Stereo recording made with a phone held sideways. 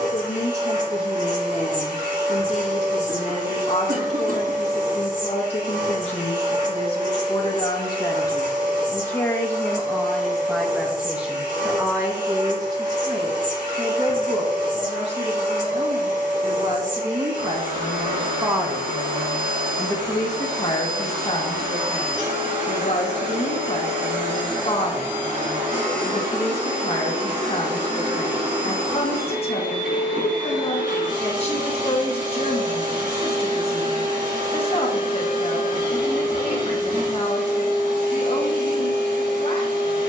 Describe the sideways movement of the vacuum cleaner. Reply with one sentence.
You can hear the vacuum cleaner stay in one place.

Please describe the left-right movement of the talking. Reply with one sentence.
In this clip you hear the talking move from left to right and back again.